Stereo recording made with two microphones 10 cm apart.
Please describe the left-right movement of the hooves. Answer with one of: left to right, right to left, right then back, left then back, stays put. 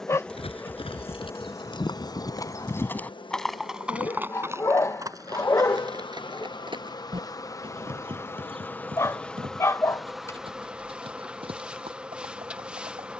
left to right.